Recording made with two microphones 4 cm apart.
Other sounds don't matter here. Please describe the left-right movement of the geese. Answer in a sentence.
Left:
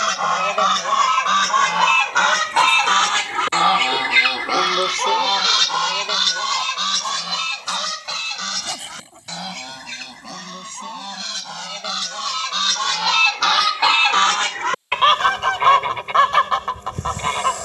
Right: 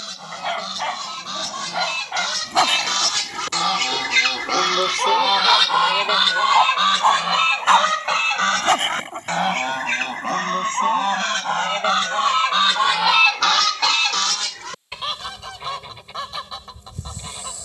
In this clip you hear the geese go right and come back.